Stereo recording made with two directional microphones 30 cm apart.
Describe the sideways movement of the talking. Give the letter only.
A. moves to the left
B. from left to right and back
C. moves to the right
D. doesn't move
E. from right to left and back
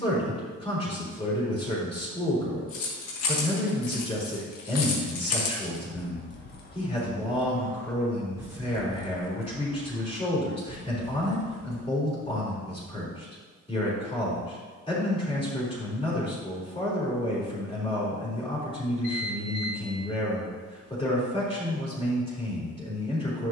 D.